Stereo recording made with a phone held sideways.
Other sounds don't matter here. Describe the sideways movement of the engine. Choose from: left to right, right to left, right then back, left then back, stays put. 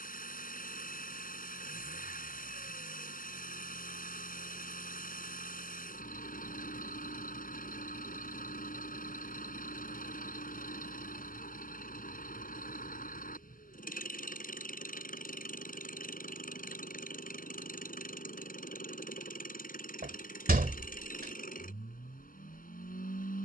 stays put.